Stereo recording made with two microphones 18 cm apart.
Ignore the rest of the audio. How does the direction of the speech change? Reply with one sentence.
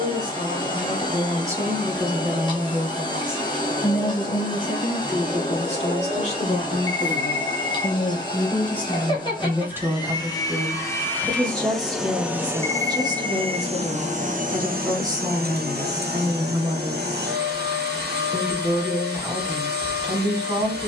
In this clip you hear the speech go left and come back.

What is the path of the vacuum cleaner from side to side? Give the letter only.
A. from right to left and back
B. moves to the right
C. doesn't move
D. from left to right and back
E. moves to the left
B.